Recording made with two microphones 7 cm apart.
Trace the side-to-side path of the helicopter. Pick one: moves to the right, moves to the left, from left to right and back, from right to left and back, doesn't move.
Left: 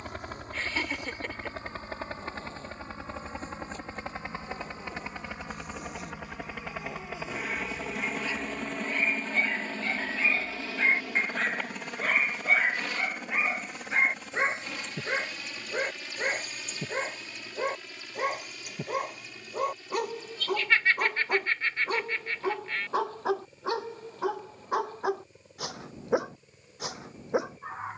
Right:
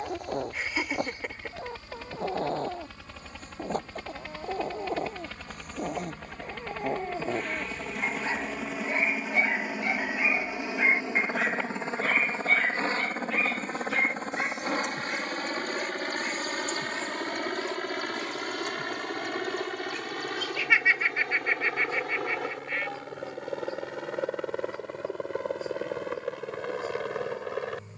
moves to the right.